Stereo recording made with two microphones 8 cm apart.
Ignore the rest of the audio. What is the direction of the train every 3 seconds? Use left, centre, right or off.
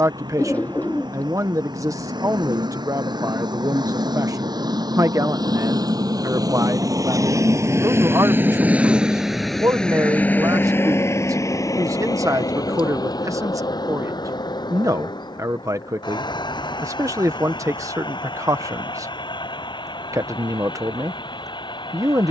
right, right, right, left, left, left, left, left.